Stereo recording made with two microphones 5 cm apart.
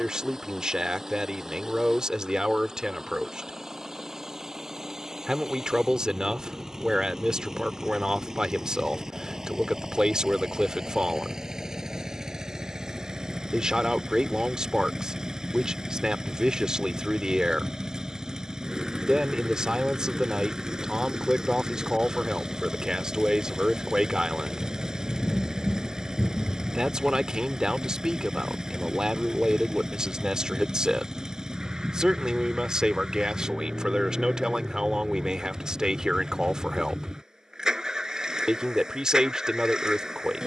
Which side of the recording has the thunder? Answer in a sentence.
In this clip you hear the thunder on the left.